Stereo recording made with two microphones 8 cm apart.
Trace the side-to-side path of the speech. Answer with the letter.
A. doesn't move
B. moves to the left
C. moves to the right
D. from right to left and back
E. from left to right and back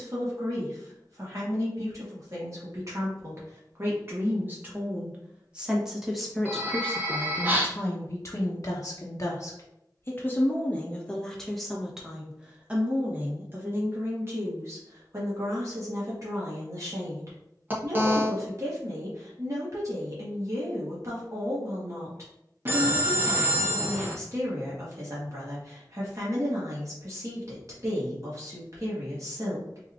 D.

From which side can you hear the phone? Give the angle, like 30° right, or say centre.
30° right.